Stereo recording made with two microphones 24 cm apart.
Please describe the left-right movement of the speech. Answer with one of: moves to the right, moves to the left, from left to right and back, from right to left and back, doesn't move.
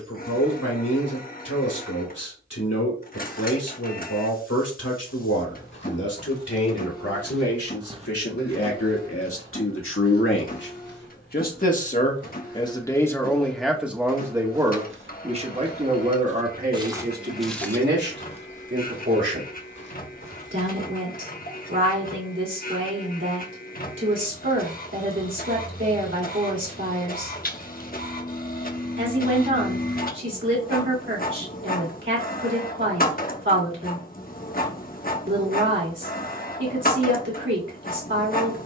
moves to the right.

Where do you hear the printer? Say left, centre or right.
left.